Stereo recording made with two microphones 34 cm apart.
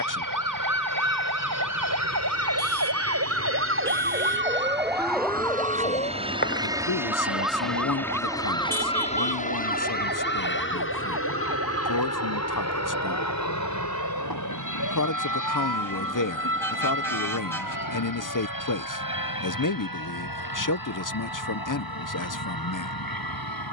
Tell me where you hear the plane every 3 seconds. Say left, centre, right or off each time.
right, right, centre, left, left, left, left, left.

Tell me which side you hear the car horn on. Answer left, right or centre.
centre.